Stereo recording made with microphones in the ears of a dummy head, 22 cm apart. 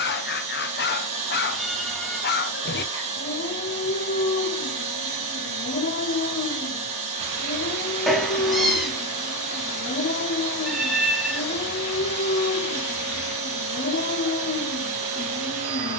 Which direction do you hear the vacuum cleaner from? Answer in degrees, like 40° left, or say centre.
30° right.